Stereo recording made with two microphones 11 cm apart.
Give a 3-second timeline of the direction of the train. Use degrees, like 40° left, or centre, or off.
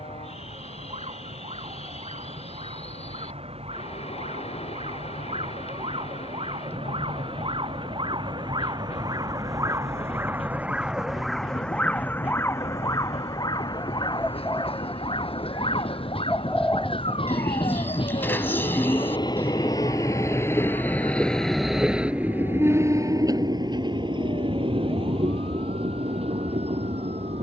80° left, 80° left, 80° left, 70° left, 70° left, 60° left, 40° left, 20° right, 60° right.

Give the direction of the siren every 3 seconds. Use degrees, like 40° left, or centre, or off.
80° right, 70° right, 50° right, 10° right, 40° left, 60° left, 70° left, 70° left, 80° left.